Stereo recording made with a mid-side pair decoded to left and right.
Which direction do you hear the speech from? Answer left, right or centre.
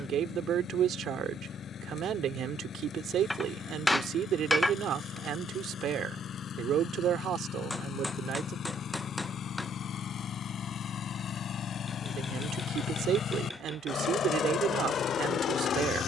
right.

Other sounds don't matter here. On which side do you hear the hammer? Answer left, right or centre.
centre.